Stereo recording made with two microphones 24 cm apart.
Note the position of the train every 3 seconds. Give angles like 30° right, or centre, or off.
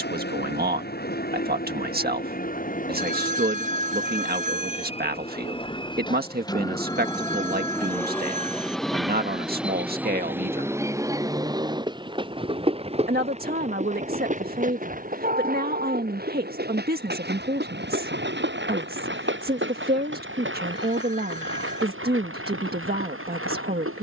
40° left, 30° left, 10° left, 10° right, 30° right, 40° right, 50° right, 60° right.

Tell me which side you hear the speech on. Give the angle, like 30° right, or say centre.
40° right.